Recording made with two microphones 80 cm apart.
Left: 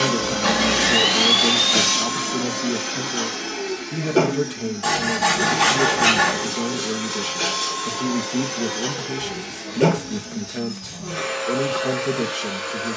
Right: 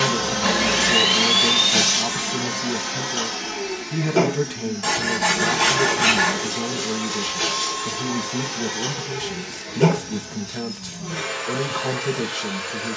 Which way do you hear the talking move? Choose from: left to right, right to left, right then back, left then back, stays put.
stays put.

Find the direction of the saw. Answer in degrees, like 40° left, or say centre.
10° right.